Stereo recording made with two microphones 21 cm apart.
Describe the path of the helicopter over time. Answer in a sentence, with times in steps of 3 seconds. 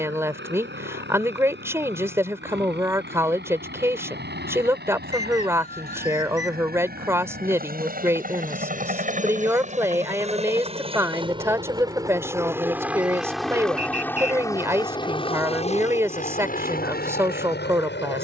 In this clip you hear the helicopter on the right from 0 s, in the centre from 12 s and on the left from 15 s.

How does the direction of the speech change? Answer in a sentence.
In this clip you hear the speech stay in one place.